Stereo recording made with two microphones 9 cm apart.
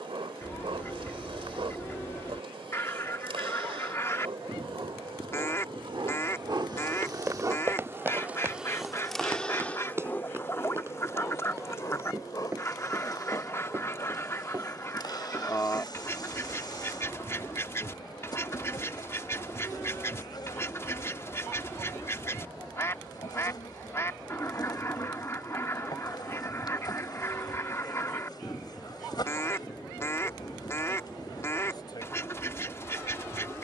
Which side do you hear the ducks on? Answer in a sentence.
You can hear the ducks on the left.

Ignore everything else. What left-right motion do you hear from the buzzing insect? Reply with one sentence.
You can hear the buzzing insect travel towards the left.